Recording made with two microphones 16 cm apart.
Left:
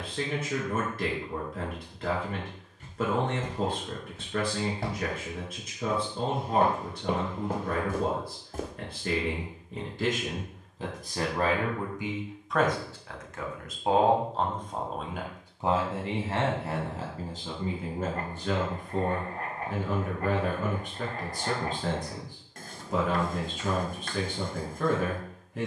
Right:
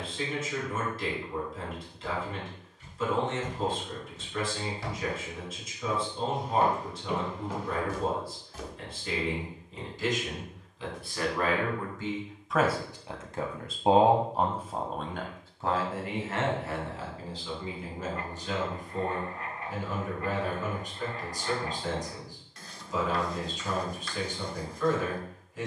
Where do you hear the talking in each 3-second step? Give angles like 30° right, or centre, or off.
60° left, 60° left, 60° left, 50° left, 10° right, 30° left, 60° left, 60° left, 60° left.